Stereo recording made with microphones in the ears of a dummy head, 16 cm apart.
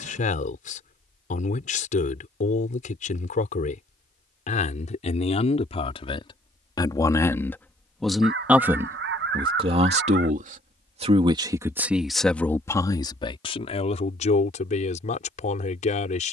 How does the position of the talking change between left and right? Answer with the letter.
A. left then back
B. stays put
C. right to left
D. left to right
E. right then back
E.